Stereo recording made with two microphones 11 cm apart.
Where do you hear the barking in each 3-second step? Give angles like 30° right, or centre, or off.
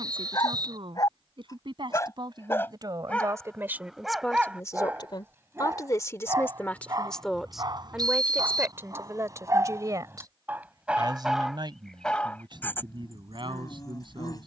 30° left, 10° right, 40° right, 20° right, 30° left.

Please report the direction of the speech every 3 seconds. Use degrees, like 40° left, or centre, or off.
50° right, 10° left, centre, 40° right, 50° right.